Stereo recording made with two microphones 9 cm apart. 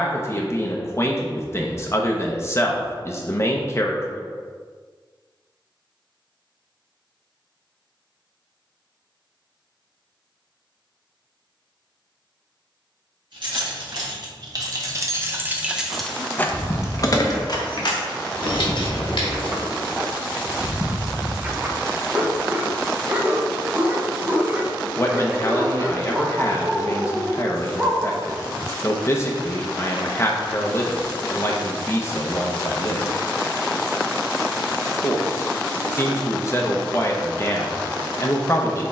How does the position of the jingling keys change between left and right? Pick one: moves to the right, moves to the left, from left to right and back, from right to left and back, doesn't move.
moves to the left.